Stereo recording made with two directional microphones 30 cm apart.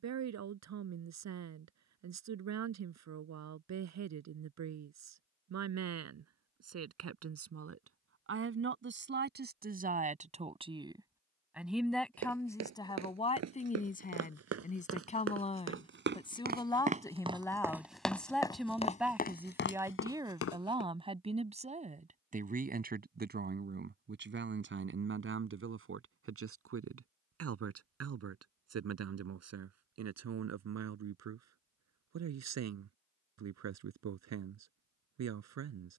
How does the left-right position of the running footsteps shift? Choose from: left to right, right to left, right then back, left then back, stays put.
right to left.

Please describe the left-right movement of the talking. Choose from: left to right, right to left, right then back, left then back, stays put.
left then back.